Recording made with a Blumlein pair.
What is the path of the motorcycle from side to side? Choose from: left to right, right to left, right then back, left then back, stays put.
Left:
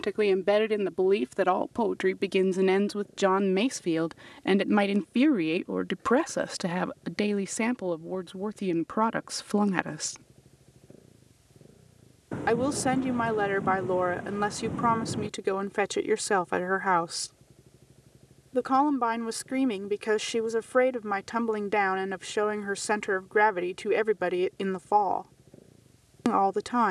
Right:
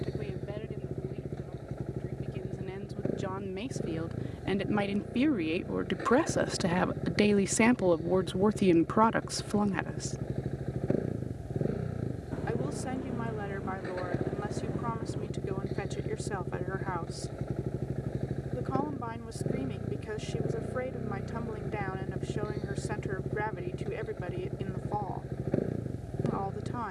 stays put.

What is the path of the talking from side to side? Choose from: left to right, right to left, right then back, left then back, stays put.
right then back.